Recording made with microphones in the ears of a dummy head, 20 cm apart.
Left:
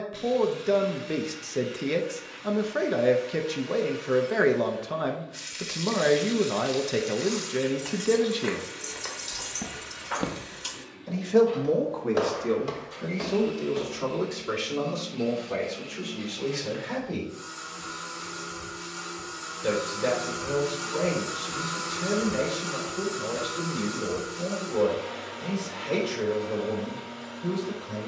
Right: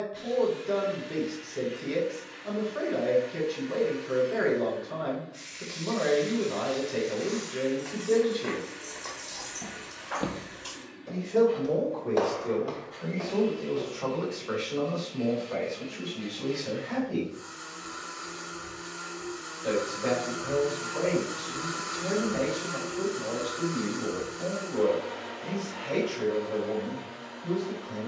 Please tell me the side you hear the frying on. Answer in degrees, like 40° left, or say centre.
50° left.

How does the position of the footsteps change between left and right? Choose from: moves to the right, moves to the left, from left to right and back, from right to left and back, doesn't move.
from left to right and back.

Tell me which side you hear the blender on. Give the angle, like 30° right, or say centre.
70° left.